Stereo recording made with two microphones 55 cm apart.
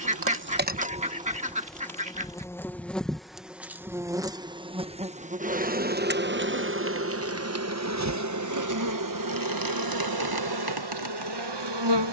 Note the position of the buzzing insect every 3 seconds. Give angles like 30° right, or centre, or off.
10° right, 10° right, 30° right, 40° right.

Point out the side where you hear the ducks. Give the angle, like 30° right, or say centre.
10° right.